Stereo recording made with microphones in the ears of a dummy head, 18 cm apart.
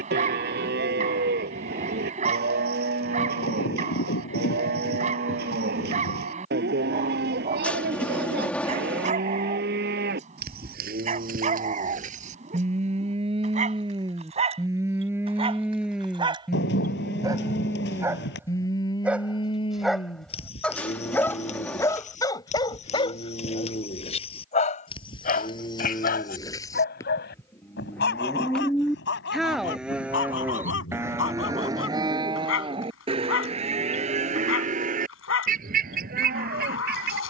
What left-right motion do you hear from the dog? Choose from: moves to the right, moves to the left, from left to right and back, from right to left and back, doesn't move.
moves to the left.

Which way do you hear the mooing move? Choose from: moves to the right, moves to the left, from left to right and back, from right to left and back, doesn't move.
from right to left and back.